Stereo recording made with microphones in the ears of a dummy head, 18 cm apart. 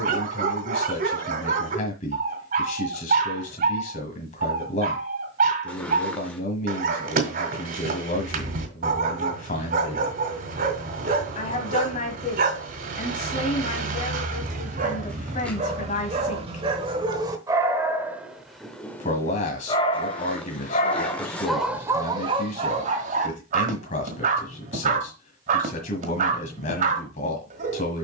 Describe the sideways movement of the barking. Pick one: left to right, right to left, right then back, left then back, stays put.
left then back.